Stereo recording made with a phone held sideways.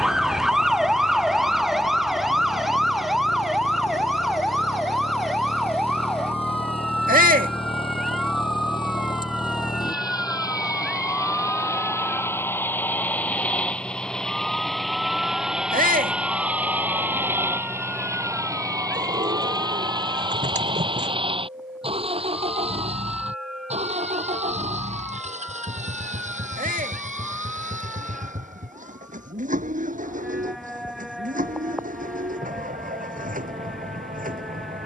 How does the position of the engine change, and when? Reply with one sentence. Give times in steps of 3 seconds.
In this clip you hear the engine on the left from 0 s, in the centre from 12 s and on the right from 18 s.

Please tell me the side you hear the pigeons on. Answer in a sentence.
In this clip you hear the pigeons on the right.